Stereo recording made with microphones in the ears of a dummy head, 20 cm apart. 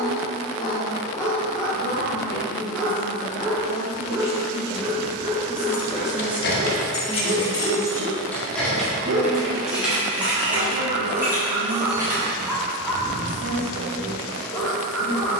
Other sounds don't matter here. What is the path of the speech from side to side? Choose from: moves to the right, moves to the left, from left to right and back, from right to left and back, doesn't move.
moves to the right.